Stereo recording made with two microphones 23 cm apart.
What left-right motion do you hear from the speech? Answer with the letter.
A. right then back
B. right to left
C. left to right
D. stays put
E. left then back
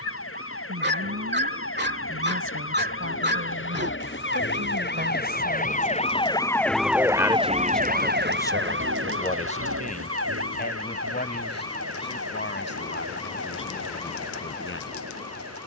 B.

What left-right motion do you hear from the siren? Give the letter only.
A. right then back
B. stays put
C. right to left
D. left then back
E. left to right
E.